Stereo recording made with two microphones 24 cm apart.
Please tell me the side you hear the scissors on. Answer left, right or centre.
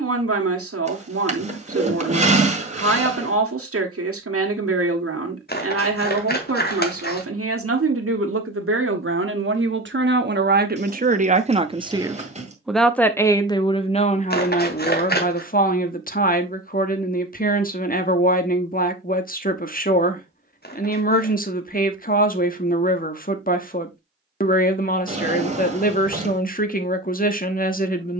left.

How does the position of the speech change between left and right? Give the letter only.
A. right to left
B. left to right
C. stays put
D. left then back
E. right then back
A.